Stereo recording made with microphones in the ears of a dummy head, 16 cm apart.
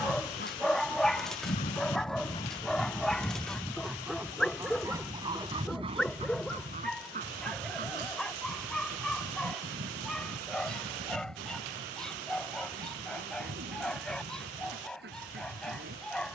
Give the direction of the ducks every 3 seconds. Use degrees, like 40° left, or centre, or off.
40° left, 10° right, 50° right, 60° right, 60° right, 60° right.